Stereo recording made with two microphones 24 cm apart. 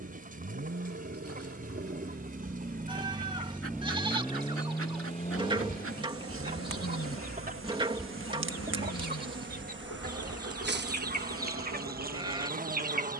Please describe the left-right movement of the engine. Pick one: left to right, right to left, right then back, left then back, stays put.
right to left.